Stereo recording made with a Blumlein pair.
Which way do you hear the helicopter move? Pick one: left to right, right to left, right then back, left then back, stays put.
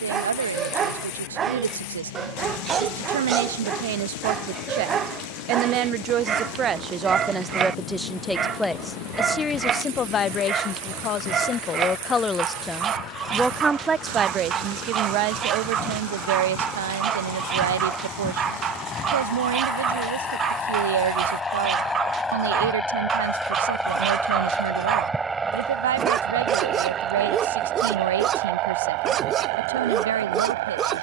left to right.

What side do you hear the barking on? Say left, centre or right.
right.